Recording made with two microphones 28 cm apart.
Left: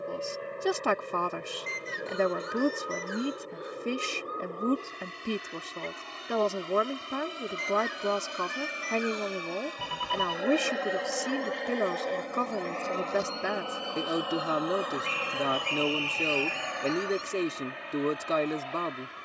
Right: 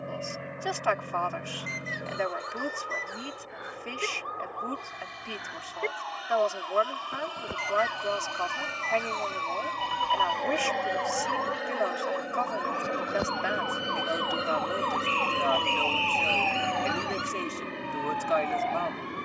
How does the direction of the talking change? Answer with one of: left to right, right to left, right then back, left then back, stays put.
stays put.